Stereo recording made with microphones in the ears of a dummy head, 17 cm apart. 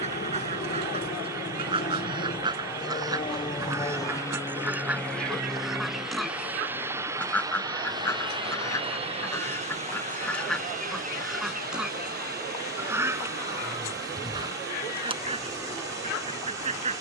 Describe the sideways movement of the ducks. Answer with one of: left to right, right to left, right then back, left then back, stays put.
left then back.